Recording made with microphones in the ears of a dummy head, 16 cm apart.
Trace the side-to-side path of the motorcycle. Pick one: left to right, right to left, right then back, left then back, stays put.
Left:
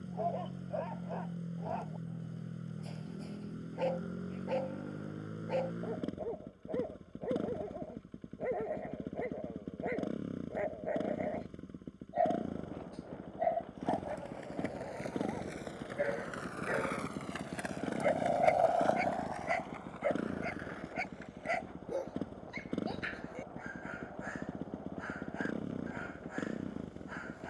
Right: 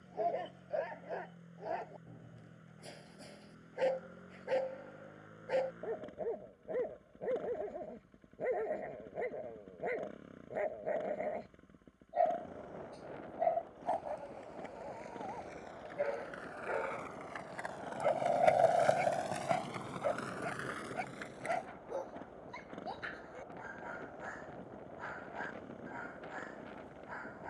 stays put.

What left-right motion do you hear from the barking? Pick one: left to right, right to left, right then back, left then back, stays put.
right to left.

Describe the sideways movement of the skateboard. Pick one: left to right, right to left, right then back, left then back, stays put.
left to right.